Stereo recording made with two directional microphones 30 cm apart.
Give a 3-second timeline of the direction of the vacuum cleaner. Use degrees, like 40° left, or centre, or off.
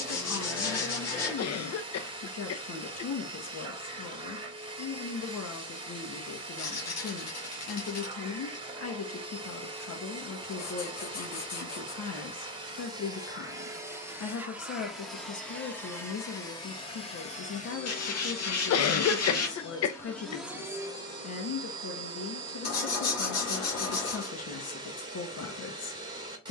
20° right, 20° right, 20° right, 20° right, 10° right, 10° left, 20° left, 20° right, 20° right.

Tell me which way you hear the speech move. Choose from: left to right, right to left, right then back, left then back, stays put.
stays put.